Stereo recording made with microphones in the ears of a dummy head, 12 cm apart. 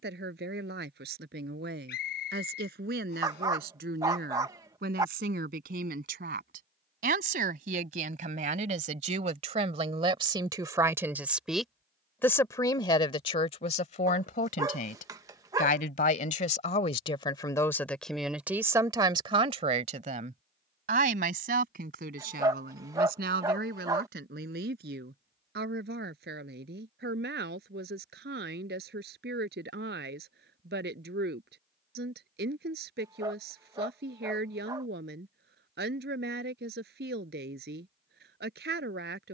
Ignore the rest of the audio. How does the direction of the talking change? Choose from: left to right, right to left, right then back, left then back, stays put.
left then back.